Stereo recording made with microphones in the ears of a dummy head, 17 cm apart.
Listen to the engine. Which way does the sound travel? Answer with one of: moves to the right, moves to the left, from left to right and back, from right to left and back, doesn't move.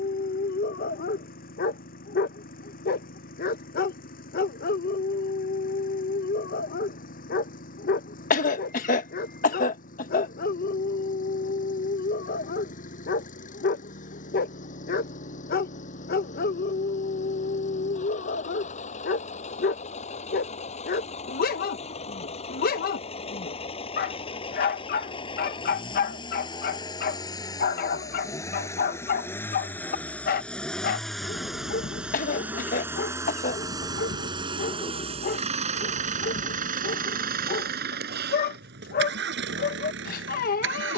moves to the right.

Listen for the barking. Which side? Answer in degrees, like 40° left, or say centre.
50° left.